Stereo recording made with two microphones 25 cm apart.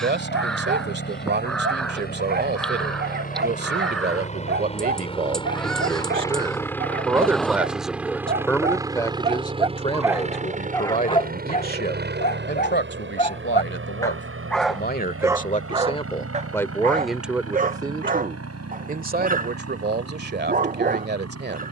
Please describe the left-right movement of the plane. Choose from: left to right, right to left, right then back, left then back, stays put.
left to right.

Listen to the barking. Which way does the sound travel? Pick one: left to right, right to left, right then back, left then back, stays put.
left then back.